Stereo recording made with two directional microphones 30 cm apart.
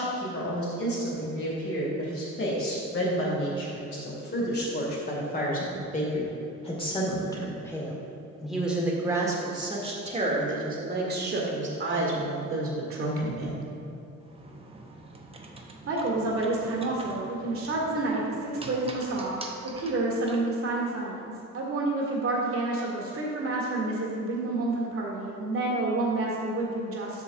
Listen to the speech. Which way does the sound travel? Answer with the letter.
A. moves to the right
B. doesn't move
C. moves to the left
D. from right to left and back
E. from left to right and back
A.